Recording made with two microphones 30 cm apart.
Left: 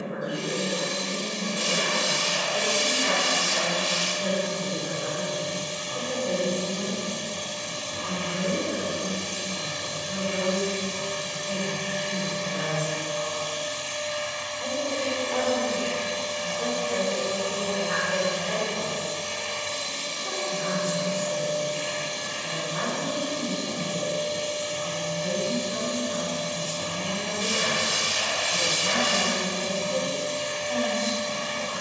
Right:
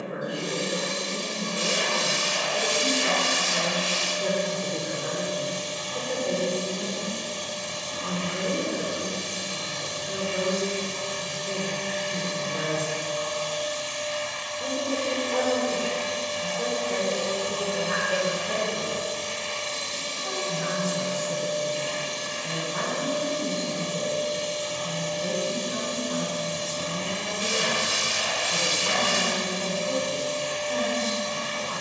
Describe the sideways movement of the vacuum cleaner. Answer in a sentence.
You can hear the vacuum cleaner move from left to right and back again.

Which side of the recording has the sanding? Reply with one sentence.
You can hear the sanding on the right.